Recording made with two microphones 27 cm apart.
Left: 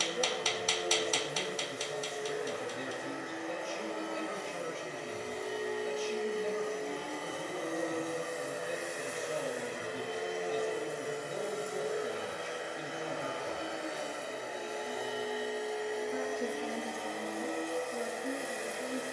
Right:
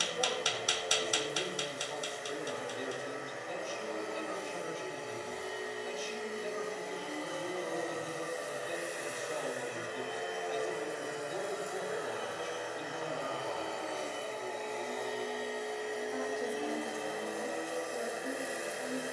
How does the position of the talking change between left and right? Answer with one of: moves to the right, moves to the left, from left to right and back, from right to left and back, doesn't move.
doesn't move.